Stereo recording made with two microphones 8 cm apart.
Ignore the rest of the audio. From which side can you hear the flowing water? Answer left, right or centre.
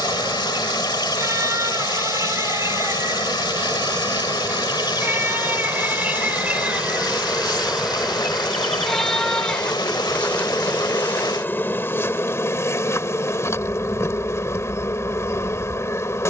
left.